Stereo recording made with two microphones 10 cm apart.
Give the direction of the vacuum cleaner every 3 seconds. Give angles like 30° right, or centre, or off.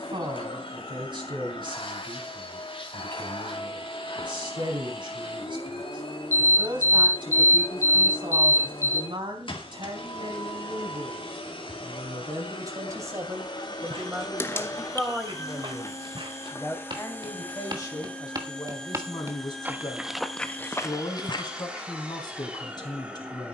60° left, 60° left, 60° left, 60° left, 50° left, 20° left, centre, 10° right.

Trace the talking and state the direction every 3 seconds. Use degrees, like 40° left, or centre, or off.
50° right, 50° right, 50° right, 50° right, 20° right, 20° left, 40° left, 40° left.